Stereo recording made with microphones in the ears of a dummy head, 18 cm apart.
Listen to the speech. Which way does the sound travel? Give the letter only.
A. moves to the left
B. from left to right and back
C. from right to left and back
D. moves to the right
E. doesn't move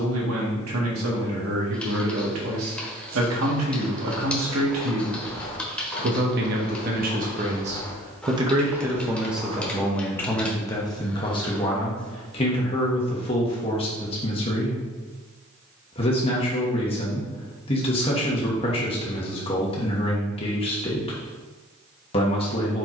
A.